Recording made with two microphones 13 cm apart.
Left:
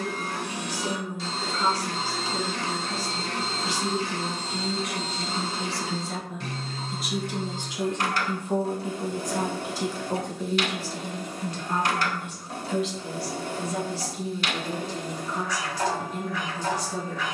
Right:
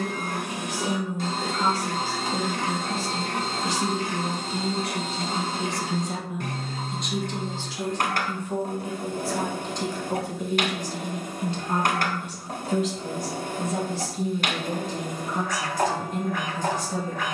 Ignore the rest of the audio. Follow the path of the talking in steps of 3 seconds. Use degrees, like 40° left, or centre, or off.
50° right, 40° right, 10° left, 10° right, 50° right, 50° right.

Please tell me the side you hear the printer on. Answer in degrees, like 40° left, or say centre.
50° right.